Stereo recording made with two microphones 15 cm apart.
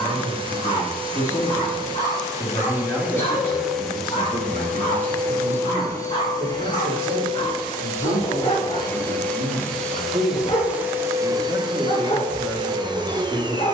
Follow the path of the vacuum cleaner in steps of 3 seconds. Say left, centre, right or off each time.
right, centre, left, centre, right.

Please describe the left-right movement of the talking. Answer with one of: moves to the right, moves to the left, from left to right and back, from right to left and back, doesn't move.
from left to right and back.